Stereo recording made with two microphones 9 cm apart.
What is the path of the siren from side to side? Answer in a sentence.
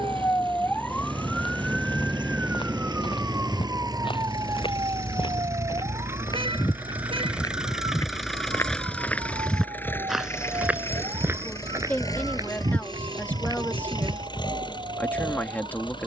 You can hear the siren go from the left side to the right.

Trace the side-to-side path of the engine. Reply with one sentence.
In this clip you hear the engine move from right to left.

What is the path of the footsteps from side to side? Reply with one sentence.
In this clip you hear the footsteps move from left to right.